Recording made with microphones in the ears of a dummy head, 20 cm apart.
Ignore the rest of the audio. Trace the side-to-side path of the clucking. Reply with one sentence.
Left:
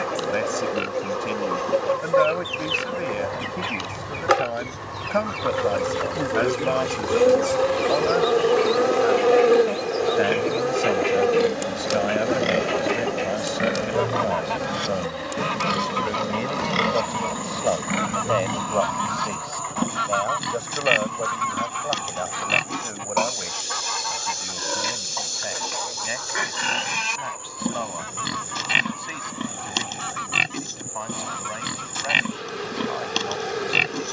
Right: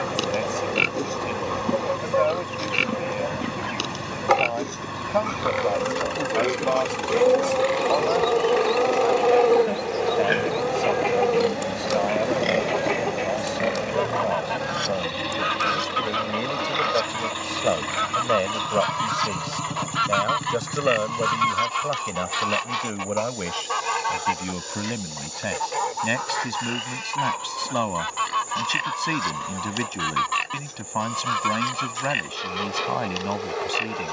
You can hear the clucking travel towards the right.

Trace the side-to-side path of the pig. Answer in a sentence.
In this clip you hear the pig travel towards the left.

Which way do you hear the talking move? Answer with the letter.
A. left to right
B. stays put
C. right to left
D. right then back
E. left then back
A.